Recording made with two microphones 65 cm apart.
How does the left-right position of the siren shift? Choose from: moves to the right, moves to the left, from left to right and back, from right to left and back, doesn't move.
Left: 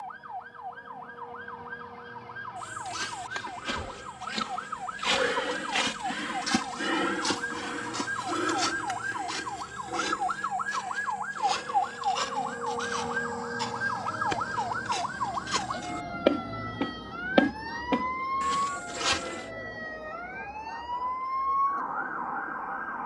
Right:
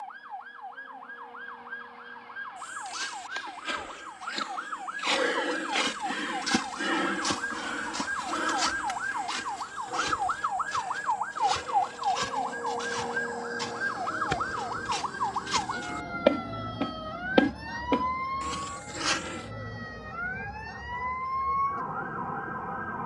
moves to the right.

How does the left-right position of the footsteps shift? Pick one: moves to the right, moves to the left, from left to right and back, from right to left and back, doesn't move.
from left to right and back.